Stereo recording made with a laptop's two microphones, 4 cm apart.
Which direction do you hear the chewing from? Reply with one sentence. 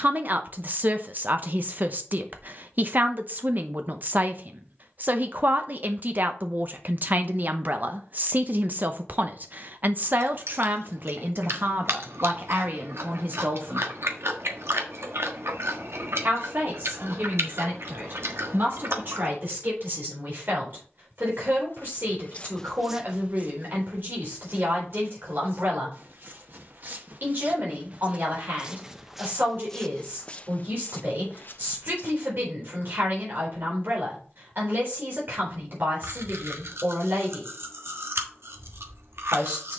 In this clip you hear the chewing on the right.